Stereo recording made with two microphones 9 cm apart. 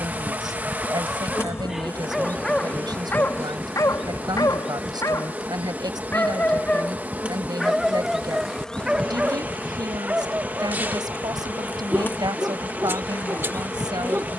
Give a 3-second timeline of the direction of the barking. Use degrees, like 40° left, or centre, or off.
10° right, 30° left, centre, 20° right, 30° right.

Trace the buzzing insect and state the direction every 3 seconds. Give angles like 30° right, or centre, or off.
20° left, centre, 10° right, 20° left, 20° left.